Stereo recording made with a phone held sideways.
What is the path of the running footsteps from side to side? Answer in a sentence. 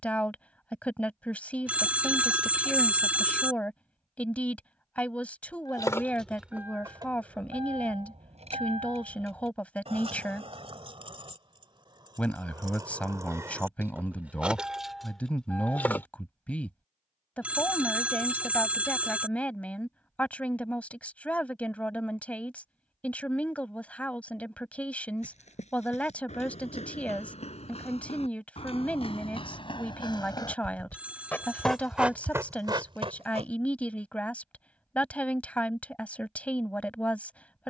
In this clip you hear the running footsteps move from left to right.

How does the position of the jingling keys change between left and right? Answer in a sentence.
You can hear the jingling keys move from left to right and back again.